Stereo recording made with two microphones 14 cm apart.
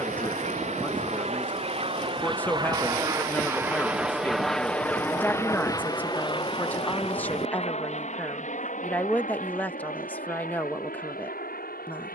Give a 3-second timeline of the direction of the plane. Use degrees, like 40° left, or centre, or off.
40° right, centre, 40° left, 60° left.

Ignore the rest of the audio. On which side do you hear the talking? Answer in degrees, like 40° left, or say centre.
10° left.